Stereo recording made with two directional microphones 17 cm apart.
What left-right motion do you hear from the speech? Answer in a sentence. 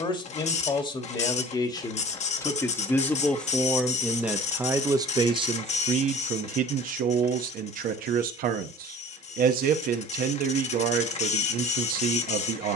In this clip you hear the speech move from left to right.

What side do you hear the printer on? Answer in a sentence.
In this clip you hear the printer on the left.